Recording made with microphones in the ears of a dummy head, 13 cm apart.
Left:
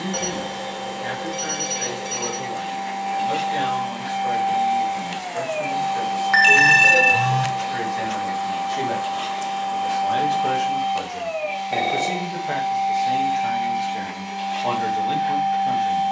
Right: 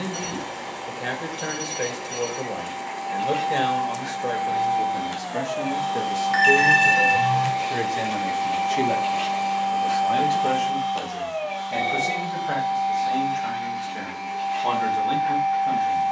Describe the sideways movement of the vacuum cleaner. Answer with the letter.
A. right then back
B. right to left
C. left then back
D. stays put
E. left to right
A.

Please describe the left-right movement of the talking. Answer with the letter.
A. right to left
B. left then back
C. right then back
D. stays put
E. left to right
A.